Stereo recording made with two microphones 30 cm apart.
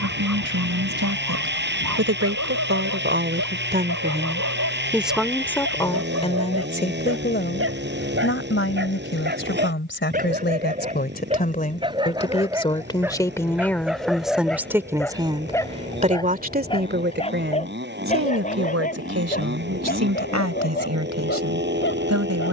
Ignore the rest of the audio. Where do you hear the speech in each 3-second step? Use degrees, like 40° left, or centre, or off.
60° right, 10° right, 30° left, 30° left, 10° left, 30° right, 50° right, 60° right.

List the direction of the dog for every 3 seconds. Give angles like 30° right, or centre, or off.
70° right, 60° right, 40° right, 30° right, centre, 10° left, 30° left, 40° left.